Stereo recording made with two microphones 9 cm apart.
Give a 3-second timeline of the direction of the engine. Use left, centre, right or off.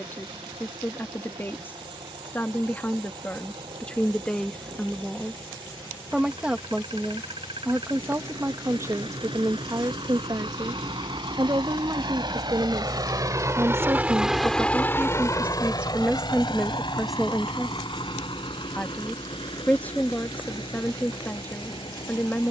right, right, right, right, right, left, left, left.